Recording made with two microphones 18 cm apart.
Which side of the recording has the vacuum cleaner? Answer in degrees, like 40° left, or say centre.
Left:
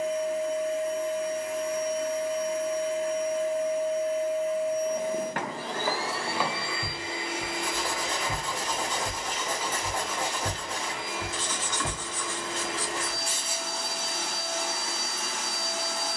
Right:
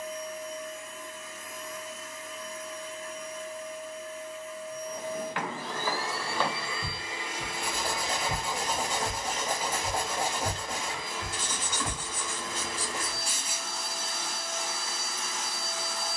70° left.